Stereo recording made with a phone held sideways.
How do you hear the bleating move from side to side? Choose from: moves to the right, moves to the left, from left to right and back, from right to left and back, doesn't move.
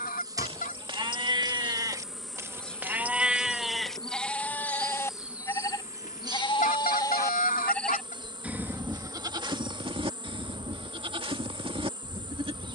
from right to left and back.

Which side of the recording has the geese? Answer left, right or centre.
left.